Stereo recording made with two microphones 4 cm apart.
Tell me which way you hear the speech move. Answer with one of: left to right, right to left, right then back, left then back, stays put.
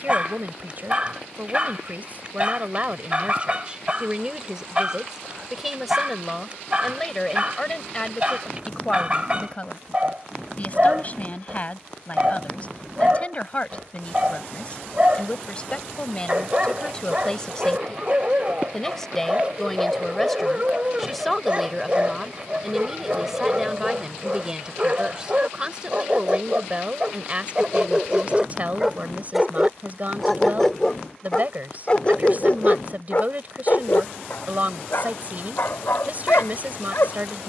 left then back.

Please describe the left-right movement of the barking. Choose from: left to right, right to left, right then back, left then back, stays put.
right to left.